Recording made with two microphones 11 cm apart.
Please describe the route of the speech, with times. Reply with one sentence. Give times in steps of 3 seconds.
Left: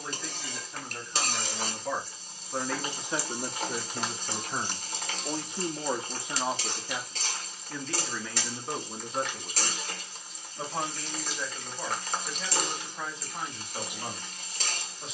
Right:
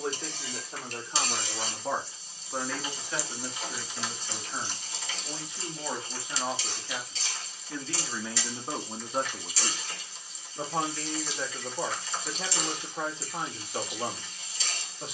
In this clip you hear the speech on the right from 0 s, on the left from 3 s, in the centre from 6 s and on the right from 9 s.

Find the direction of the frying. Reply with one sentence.
In this clip you hear the frying on the left.